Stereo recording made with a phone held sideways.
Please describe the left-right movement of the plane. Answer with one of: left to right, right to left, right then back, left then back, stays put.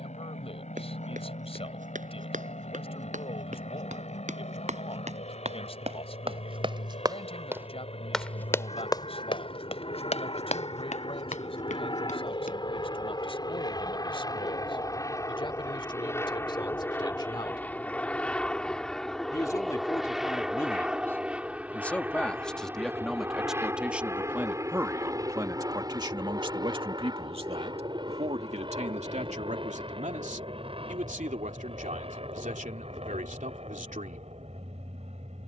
left to right.